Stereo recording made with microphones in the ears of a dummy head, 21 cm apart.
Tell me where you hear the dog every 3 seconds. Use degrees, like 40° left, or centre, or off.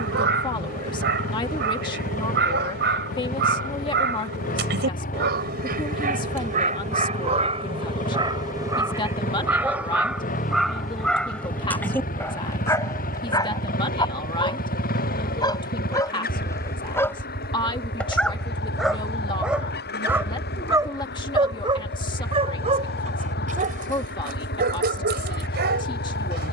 50° right, 50° right, 30° right, centre, 20° left, 10° left, centre, 30° right, 40° right.